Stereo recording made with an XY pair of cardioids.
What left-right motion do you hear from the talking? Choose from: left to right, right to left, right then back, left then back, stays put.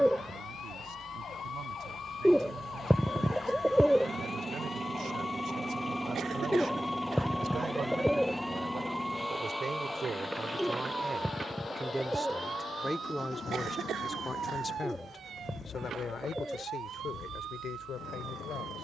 right to left.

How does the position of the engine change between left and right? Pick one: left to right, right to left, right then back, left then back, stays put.
right to left.